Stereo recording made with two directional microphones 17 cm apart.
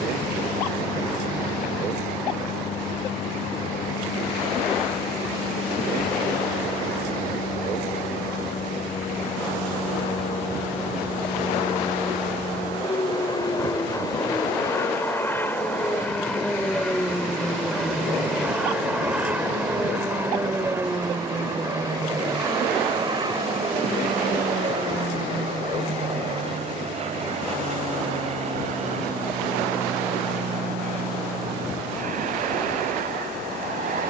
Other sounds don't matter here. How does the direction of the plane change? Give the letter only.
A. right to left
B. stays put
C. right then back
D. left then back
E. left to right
E.